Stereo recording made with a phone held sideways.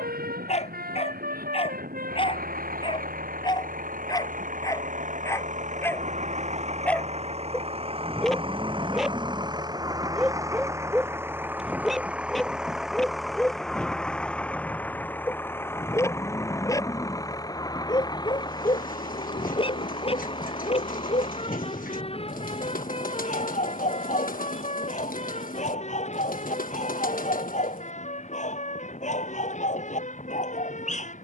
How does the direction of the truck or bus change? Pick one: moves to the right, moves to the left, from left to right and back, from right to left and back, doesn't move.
moves to the left.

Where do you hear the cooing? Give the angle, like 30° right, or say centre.
60° left.